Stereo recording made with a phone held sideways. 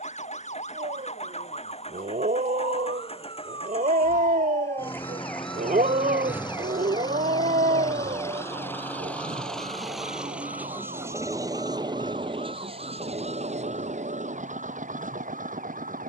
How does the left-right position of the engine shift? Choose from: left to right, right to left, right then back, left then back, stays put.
left to right.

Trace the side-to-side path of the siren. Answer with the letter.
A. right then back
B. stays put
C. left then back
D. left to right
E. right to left
D.